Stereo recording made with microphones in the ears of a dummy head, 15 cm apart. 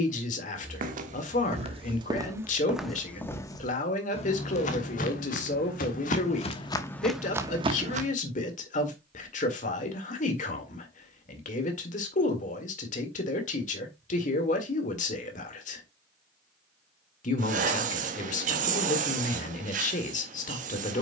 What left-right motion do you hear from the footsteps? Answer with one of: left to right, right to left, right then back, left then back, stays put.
left then back.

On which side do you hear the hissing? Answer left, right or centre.
right.